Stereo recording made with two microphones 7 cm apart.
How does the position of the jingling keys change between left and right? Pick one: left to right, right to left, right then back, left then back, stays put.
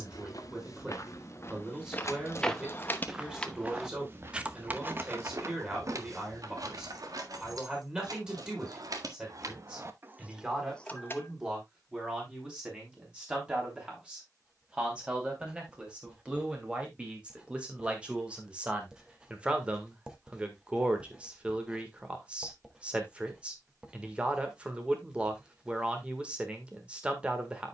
right then back.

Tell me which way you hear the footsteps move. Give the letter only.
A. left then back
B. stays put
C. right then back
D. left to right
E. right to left
D.